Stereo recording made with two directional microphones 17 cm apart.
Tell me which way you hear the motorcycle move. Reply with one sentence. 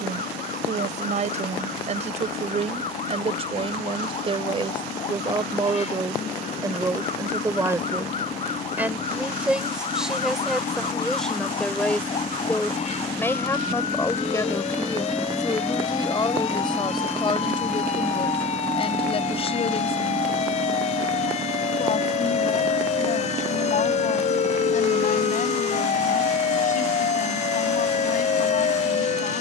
In this clip you hear the motorcycle move from left to right.